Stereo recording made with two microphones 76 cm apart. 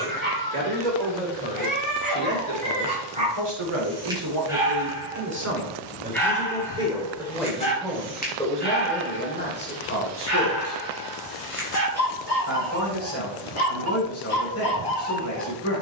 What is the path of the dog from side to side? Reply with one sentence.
You can hear the dog go from the right side to the left.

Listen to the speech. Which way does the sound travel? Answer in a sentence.
In this clip you hear the speech travel towards the left.